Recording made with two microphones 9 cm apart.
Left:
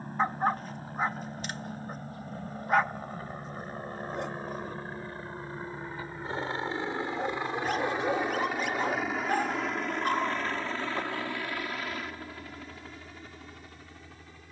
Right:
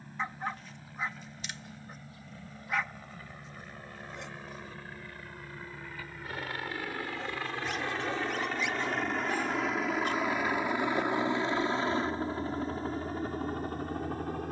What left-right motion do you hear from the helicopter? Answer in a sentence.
In this clip you hear the helicopter move to the right.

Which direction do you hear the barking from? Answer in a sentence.
In this clip you hear the barking on the left.